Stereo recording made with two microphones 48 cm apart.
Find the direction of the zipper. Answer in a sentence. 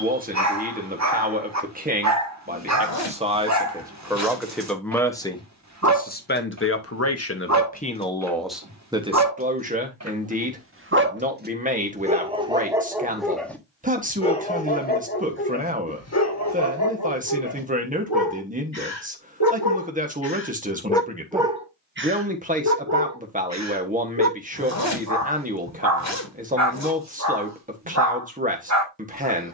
You can hear the zipper on the left.